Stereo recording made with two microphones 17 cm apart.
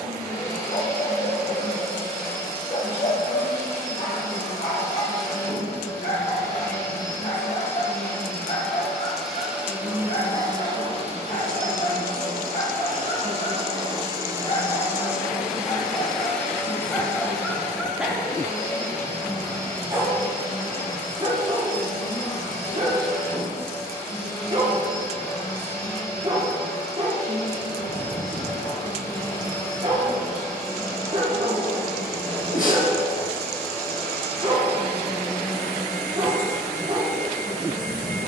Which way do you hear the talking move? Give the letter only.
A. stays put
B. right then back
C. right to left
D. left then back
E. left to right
D.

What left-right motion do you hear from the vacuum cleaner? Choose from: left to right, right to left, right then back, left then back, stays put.
right then back.